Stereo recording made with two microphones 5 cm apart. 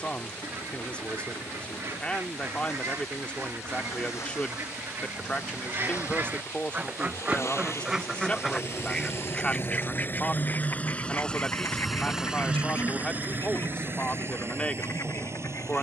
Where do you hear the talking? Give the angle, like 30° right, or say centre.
20° left.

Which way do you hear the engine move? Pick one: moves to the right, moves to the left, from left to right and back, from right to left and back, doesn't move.
moves to the right.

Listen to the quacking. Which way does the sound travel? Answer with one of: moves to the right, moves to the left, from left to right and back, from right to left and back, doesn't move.
moves to the left.